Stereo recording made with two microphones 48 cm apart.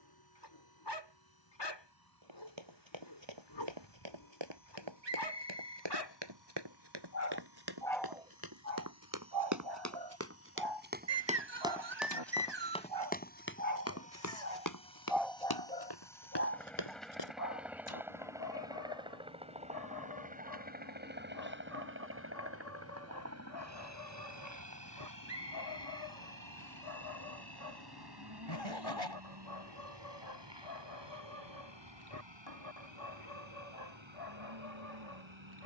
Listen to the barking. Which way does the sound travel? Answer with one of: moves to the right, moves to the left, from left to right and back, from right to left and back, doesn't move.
from left to right and back.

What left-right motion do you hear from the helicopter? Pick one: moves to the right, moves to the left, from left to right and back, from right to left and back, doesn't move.
moves to the right.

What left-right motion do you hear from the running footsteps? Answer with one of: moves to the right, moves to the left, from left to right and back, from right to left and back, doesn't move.
moves to the left.